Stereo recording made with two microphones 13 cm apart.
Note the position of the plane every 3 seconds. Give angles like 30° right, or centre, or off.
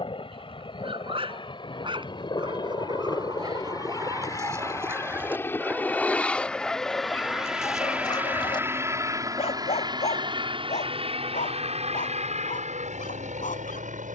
40° left, 20° left, centre, 40° right, 60° right.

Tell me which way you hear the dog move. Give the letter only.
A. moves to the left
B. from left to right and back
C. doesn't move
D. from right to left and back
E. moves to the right
A.